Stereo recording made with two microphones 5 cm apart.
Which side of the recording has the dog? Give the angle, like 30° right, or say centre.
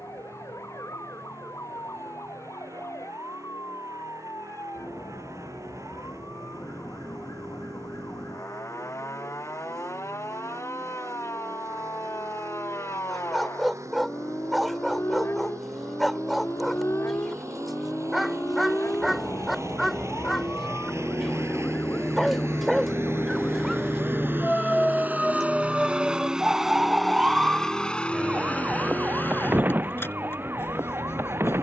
centre.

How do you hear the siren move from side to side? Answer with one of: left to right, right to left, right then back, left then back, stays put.
left to right.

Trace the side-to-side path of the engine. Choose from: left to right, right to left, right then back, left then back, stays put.
right to left.